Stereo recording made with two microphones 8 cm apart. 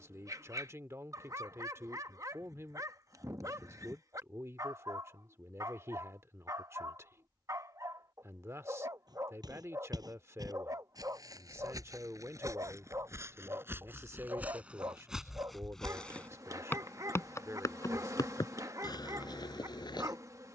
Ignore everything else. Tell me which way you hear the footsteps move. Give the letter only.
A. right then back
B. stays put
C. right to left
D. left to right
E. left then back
C.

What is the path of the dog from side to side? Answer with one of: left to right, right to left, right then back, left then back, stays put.
stays put.